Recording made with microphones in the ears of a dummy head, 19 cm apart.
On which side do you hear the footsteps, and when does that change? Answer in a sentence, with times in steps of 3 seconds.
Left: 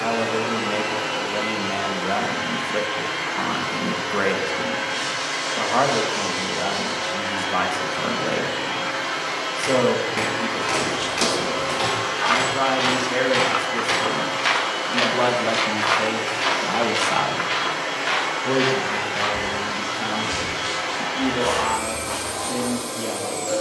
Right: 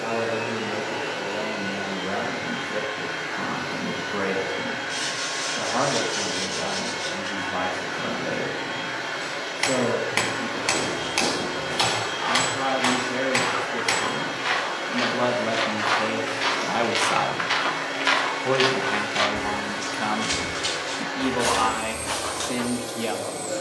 You can hear the footsteps not at all from 0 s, on the left from 9 s, in the centre from 15 s and on the right from 18 s.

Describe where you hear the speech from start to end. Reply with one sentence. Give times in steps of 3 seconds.
You can hear the speech on the left from 0 s, in the centre from 15 s and on the right from 18 s.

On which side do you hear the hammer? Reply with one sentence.
You can hear the hammer on the right.